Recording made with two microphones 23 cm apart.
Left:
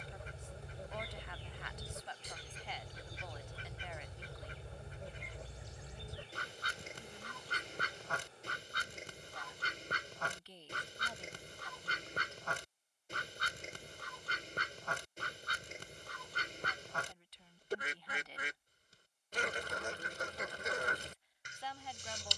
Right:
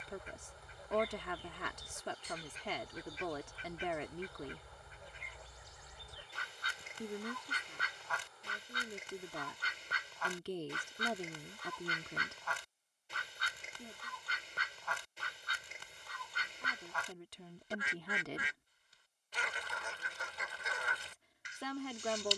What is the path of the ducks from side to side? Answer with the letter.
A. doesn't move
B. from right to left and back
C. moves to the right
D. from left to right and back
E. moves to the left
A.